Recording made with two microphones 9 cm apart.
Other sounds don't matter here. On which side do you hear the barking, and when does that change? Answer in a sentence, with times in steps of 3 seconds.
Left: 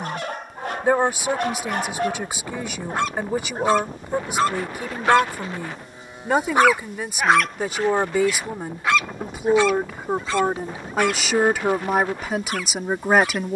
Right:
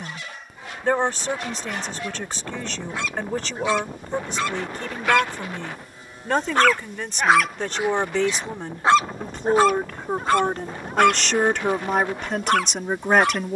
You can hear the barking on the left from 0 s, in the centre from 6 s and on the right from 9 s.